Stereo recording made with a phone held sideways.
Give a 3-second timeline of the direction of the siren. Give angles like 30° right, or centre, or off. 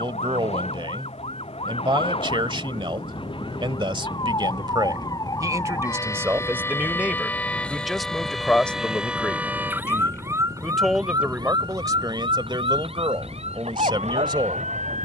40° left, 30° left, 10° left, 20° right, 40° right.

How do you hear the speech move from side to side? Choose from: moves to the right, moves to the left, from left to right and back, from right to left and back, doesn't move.
from right to left and back.